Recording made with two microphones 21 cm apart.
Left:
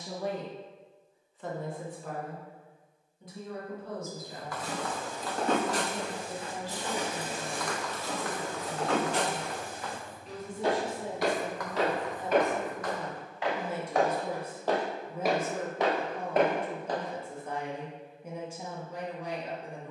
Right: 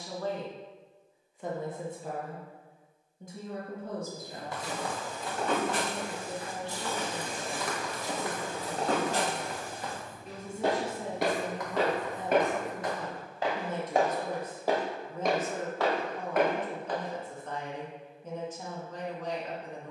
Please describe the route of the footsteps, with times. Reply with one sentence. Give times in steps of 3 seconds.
In this clip you hear the footsteps not at all from 0 s, on the left from 3 s, in the centre from 6 s, on the right from 9 s, on the left from 15 s and not at all from 18 s.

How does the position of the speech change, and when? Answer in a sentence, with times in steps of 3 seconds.
You can hear the speech in the centre from 0 s, on the right from 3 s and in the centre from 12 s.